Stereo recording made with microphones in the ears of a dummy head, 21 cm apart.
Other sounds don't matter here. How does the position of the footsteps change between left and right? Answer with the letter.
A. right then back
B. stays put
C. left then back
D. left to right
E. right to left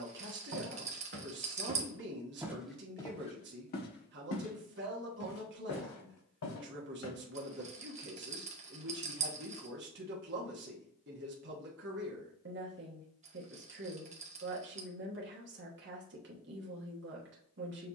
E.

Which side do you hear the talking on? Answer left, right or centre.
right.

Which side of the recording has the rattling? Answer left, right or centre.
right.